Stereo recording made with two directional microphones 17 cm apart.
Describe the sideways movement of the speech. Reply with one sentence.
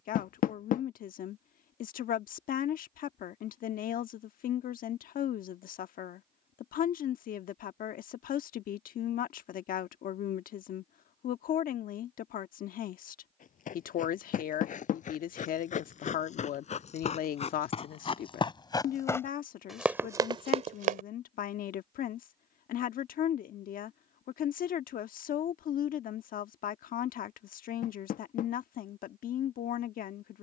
You can hear the speech stay in one place.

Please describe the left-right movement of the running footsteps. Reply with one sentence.
In this clip you hear the running footsteps move to the right.